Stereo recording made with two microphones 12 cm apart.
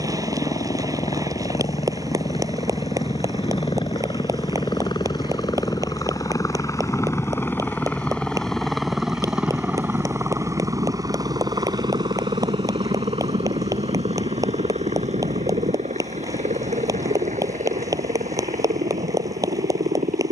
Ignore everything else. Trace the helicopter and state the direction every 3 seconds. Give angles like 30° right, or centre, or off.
60° left, 40° left, 20° left, 20° right, 50° right, 70° right, 70° right.